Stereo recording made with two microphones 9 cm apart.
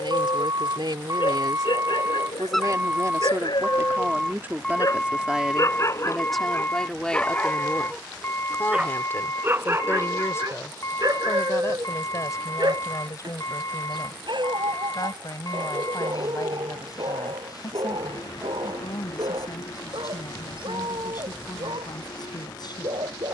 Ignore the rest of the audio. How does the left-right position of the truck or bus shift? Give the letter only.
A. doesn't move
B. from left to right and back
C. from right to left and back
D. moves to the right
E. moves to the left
E.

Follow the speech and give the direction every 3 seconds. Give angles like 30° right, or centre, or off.
60° right, 20° right, 10° left, 30° left, 40° left, 50° left, 50° left, 50° left.